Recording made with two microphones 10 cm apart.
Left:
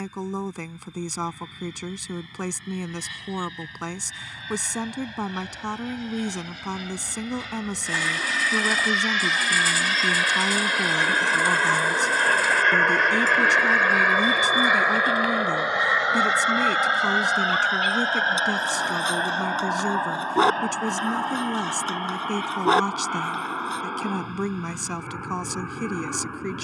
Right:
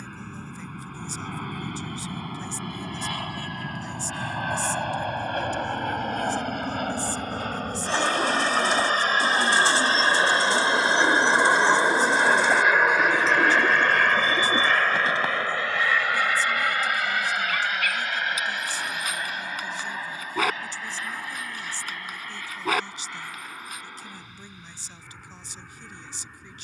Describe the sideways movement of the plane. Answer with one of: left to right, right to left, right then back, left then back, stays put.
right to left.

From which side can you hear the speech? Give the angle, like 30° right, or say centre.
80° left.